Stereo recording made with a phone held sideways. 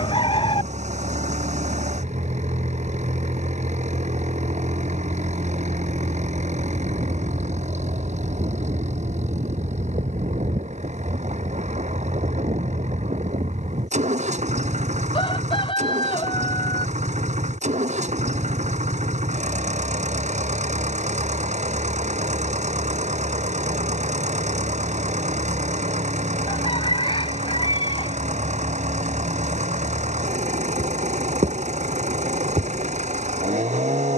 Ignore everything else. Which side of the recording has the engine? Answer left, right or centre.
right.